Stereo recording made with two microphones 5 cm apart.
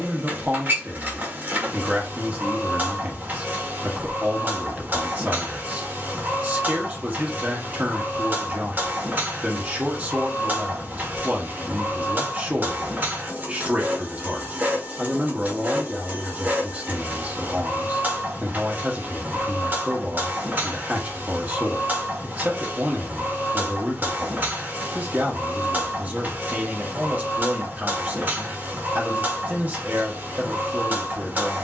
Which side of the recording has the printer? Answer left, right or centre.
right.